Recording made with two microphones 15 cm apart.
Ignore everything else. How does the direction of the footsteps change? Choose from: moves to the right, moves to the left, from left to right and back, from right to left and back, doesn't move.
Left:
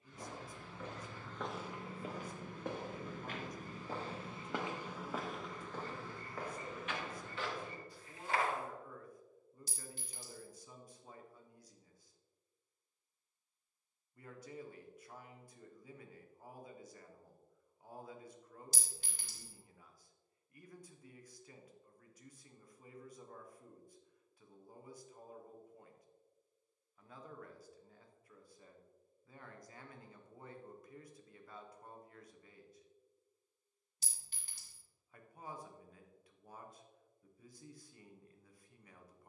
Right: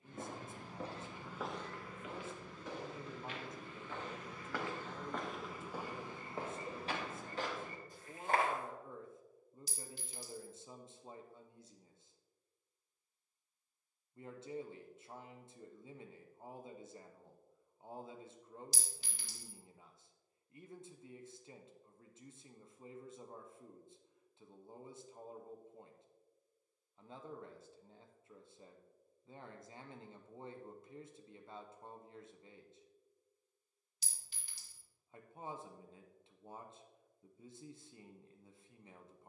from right to left and back.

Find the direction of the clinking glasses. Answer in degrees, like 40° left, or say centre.
50° left.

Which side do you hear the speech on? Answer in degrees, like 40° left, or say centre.
20° right.